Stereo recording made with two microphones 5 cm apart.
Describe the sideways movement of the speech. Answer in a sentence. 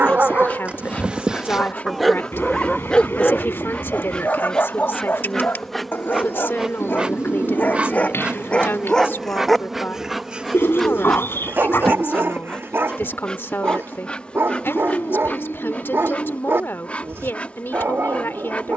You can hear the speech stay in one place.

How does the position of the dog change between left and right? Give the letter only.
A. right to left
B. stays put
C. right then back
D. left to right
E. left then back
E.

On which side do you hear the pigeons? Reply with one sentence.
You can hear the pigeons on the left.